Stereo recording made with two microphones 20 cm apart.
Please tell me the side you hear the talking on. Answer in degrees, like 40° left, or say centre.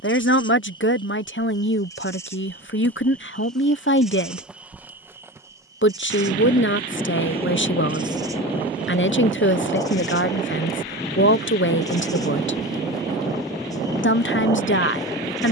70° left.